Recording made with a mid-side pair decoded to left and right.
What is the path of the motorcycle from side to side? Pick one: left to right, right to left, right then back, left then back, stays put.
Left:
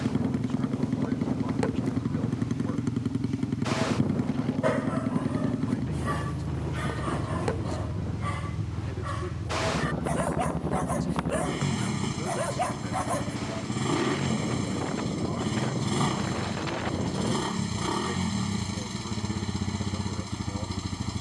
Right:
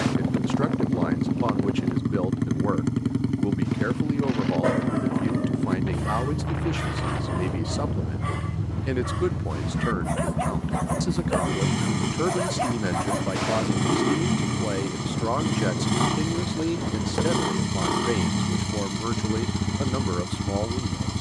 stays put.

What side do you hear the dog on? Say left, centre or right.
centre.